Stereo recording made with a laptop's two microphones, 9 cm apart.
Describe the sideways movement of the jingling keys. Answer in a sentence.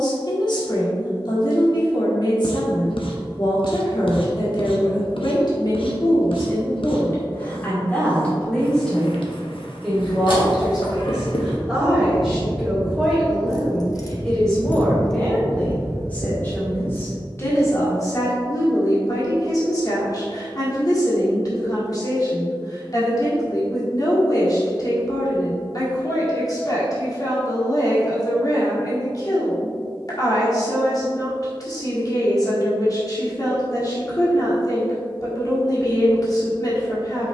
You can hear the jingling keys move to the right.